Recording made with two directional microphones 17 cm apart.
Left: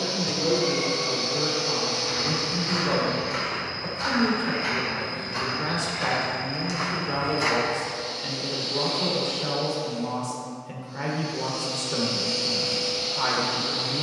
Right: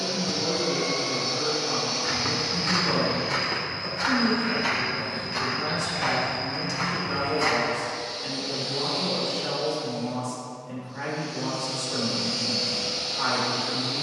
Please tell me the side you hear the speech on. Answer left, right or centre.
left.